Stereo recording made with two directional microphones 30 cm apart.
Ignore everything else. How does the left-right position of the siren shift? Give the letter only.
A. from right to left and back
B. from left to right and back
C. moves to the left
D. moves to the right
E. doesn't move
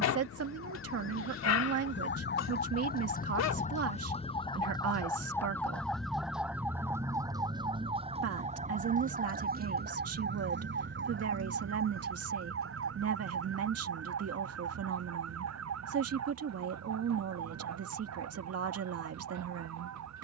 D.